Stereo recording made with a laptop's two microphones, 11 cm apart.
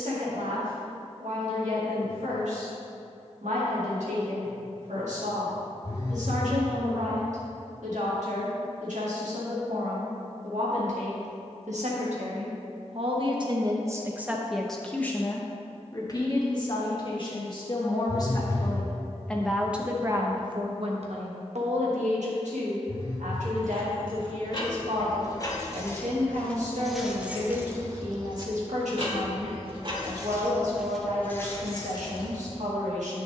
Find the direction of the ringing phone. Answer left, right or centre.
left.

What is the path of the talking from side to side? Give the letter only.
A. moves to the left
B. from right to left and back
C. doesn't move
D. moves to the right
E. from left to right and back
B.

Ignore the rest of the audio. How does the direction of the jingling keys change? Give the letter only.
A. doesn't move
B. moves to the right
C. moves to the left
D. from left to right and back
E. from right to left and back
D.